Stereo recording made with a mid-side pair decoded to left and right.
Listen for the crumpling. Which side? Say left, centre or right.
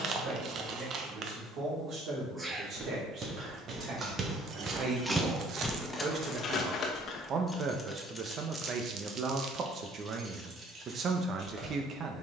right.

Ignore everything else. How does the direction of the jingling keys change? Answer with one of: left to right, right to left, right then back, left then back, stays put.
left then back.